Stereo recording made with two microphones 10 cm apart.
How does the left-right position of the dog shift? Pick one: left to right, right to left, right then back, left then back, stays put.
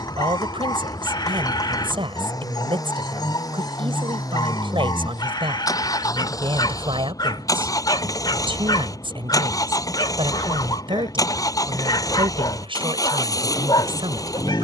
stays put.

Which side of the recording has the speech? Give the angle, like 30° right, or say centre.
70° right.